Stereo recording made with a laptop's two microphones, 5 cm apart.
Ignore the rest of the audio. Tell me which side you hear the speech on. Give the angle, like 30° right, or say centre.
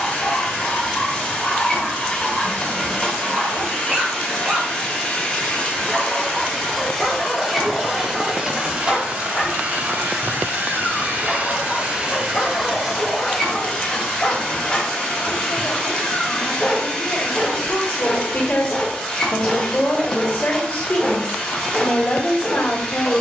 40° left.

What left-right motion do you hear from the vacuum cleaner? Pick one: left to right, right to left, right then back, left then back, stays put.
right then back.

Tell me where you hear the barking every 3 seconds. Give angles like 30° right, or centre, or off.
10° left, 20° right, 10° left, 20° left, 20° left, 20° left, 20° left, 20° left.